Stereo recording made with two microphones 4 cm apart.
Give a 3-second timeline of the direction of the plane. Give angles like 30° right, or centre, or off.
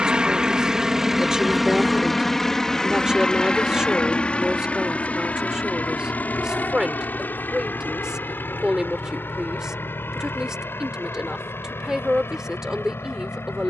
centre, 20° left, 40° left, 50° left, 50° left.